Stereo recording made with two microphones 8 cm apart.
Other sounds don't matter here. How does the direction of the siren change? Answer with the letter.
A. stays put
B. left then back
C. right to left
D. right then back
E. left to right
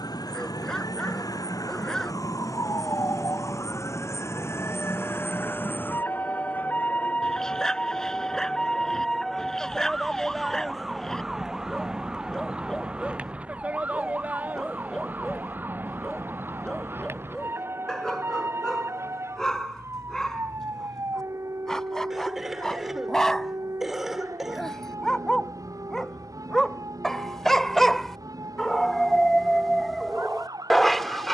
E.